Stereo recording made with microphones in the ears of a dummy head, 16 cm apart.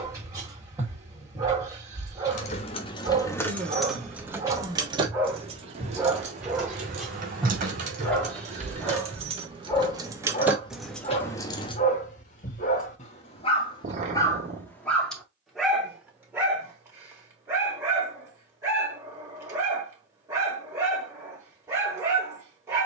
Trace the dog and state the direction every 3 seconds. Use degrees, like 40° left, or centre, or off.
20° right, 20° right, centre, 30° left, 30° left, 10° right, 20° right, 20° right.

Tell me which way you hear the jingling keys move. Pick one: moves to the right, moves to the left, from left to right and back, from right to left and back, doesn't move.
from left to right and back.